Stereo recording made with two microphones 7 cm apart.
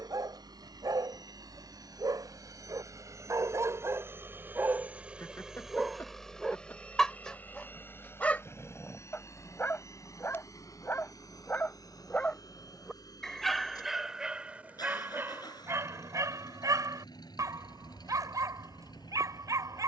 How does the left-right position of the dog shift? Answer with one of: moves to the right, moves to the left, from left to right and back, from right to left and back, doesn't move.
from right to left and back.